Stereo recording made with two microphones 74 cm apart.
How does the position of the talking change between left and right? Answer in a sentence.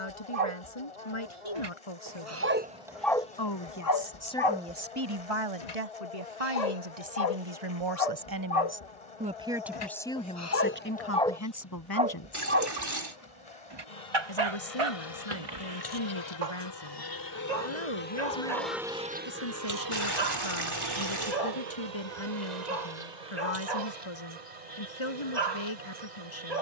You can hear the talking move from left to right and back again.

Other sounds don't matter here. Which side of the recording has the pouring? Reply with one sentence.
You can hear the pouring on the right.